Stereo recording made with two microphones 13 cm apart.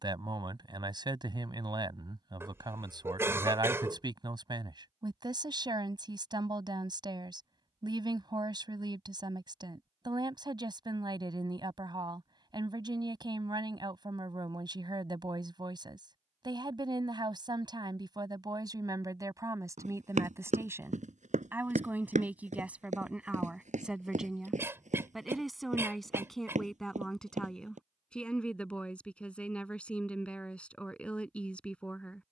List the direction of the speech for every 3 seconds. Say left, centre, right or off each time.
right, right, right, right, right, right, right, centre, centre, centre, centre.